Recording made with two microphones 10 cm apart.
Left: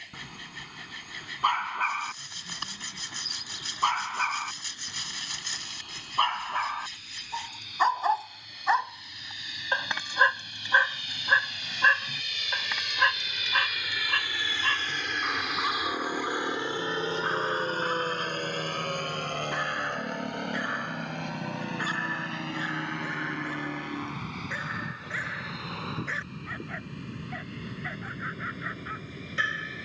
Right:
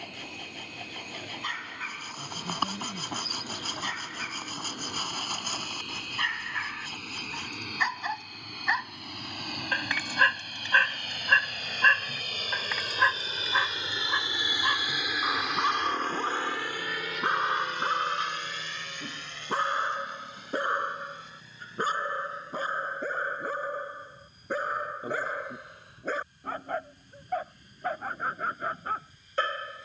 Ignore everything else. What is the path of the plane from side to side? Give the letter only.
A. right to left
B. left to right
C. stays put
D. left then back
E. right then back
A.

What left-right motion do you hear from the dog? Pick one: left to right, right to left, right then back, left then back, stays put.
left to right.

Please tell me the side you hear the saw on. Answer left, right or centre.
right.